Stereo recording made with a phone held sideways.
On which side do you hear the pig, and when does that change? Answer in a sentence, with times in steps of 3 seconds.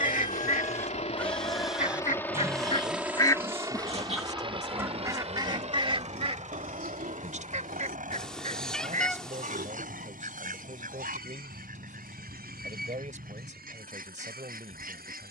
You can hear the pig in the centre from 0 s and on the right from 3 s.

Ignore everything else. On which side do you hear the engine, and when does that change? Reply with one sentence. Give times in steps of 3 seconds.
You can hear the engine on the left from 0 s and on the right from 3 s.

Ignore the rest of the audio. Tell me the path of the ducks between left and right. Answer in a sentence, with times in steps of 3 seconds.
In this clip you hear the ducks on the left from 0 s, in the centre from 3 s and on the right from 6 s.